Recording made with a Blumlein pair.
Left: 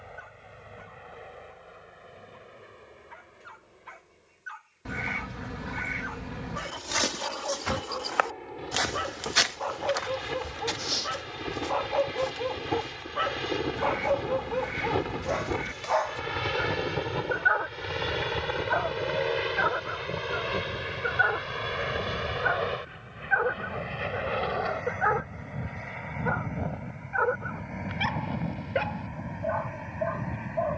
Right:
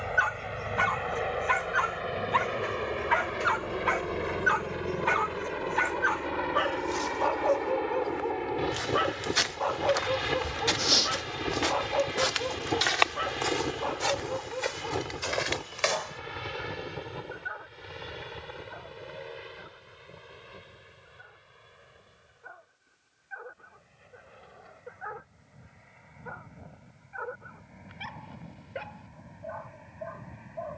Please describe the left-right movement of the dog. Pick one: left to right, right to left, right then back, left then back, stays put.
right to left.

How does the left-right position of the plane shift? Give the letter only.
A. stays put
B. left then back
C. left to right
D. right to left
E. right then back
D.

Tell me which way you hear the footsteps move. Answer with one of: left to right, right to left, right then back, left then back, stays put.
left to right.